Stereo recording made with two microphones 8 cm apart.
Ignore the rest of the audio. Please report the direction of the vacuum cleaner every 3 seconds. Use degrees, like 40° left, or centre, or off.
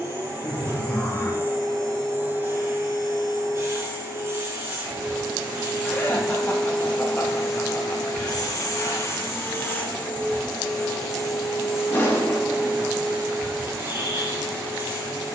30° right, 30° right, 30° left, 10° left, 20° right.